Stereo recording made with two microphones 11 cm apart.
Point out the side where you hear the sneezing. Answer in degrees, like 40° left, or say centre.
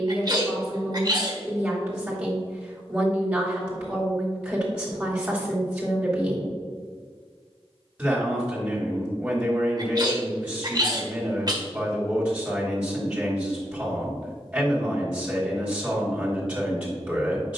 40° right.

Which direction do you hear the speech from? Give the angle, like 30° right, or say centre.
10° right.